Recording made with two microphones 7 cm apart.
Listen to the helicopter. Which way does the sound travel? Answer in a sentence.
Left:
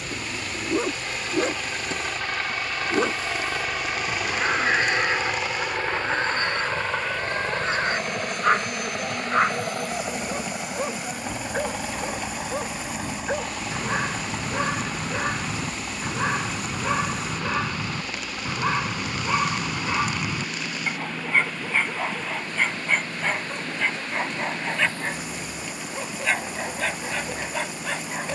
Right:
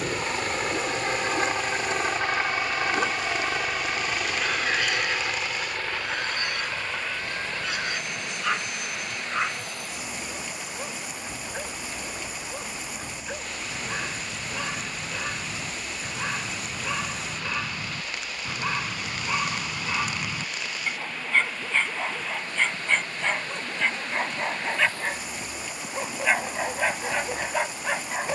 You can hear the helicopter travel towards the left.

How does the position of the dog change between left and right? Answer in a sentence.
You can hear the dog travel towards the right.